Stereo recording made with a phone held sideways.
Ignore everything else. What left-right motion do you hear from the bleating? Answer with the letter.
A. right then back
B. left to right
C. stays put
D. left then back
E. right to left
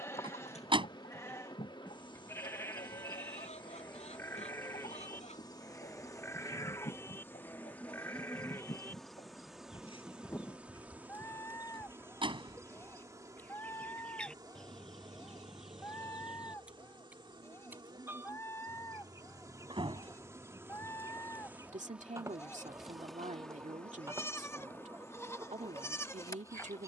C.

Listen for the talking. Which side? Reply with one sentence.
In this clip you hear the talking on the right.